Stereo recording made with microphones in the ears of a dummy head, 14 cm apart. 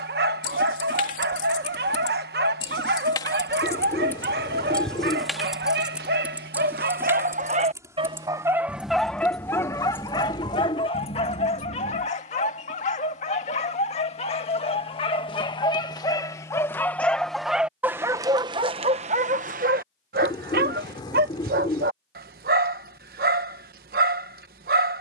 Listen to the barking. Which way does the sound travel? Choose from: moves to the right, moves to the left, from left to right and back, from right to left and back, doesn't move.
from right to left and back.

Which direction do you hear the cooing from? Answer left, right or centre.
left.